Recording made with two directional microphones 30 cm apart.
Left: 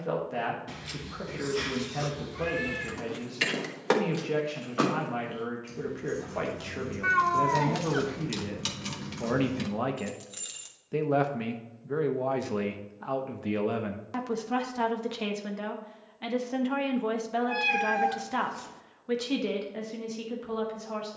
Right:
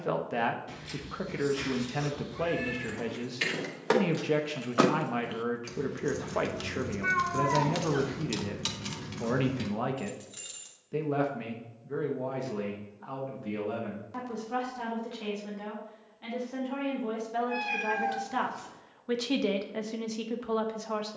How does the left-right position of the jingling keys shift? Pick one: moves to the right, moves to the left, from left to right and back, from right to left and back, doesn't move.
from left to right and back.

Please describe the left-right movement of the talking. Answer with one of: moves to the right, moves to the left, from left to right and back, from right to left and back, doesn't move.
from right to left and back.